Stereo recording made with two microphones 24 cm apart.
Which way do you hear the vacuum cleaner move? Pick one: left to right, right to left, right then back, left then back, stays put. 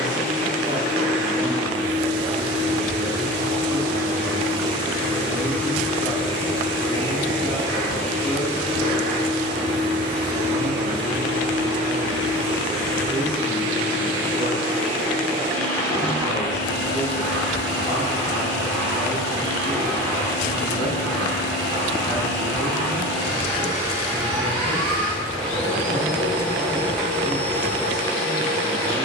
stays put.